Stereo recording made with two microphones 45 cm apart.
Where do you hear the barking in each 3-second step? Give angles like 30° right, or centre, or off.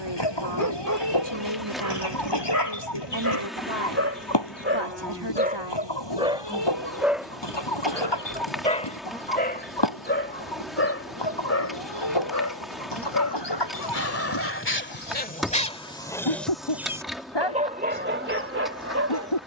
40° right, 30° right, centre, 30° left, 30° left, centre, 30° right.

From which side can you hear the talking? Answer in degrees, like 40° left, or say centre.
70° right.